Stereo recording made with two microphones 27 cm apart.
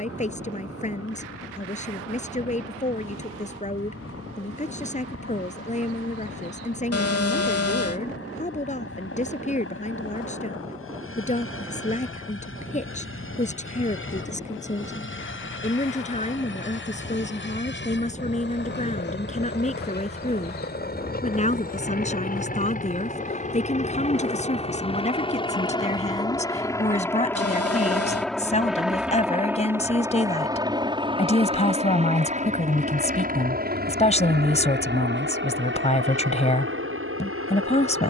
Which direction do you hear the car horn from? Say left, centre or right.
left.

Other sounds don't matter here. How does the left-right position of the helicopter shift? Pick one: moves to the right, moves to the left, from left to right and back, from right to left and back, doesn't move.
moves to the right.